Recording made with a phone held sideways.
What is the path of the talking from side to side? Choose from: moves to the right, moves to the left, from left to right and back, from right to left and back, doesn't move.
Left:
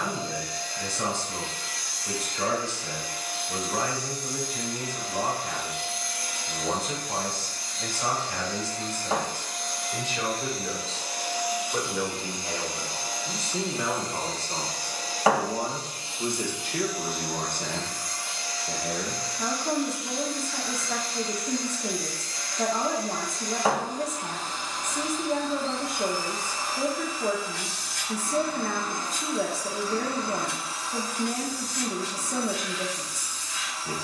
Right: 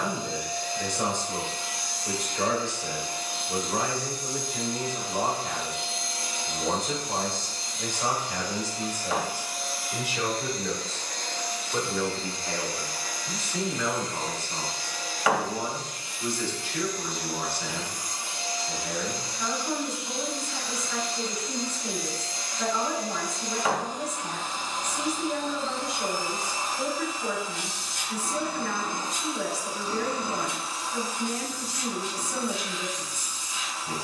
moves to the left.